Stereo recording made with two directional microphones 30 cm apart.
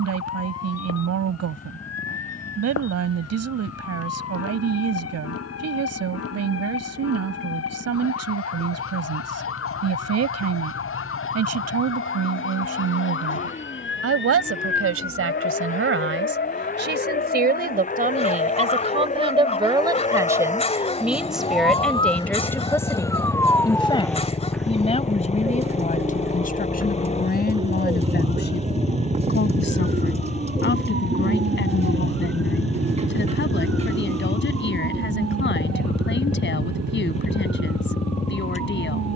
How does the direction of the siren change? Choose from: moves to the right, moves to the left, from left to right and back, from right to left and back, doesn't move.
moves to the right.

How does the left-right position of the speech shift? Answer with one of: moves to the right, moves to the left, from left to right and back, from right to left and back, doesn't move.
moves to the left.